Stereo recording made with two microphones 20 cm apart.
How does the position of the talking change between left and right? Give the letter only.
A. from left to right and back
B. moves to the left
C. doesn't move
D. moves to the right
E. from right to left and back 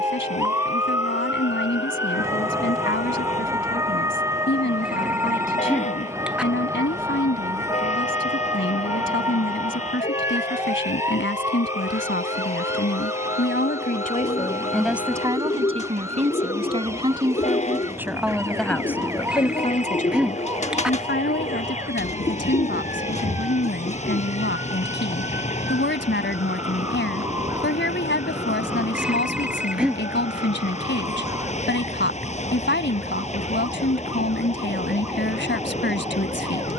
A.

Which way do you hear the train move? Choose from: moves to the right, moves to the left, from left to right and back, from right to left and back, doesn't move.
doesn't move.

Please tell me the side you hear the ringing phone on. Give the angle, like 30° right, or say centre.
centre.